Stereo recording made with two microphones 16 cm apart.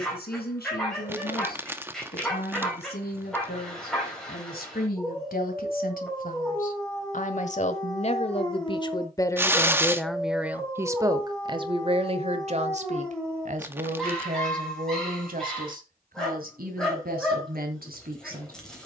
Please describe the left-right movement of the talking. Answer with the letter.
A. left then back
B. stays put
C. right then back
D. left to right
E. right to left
D.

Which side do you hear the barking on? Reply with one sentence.
In this clip you hear the barking in the centre.